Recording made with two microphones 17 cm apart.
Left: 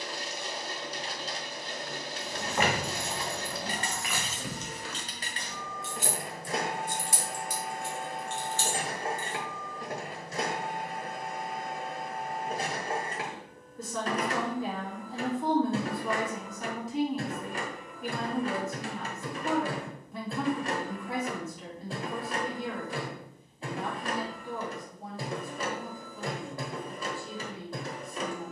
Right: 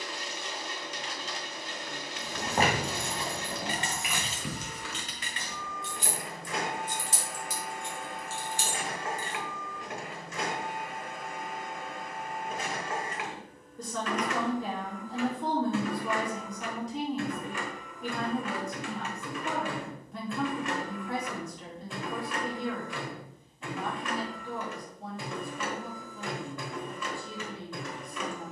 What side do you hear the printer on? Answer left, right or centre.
left.